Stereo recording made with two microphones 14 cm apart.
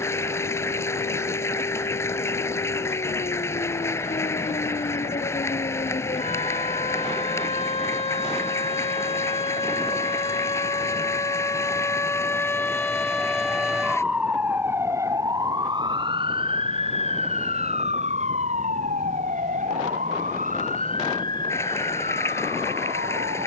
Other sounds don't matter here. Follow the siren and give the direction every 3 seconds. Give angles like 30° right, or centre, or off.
60° left, 60° left, 50° left, 30° left, centre, 40° right, 60° right, 70° right.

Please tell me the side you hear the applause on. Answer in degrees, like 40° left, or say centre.
20° left.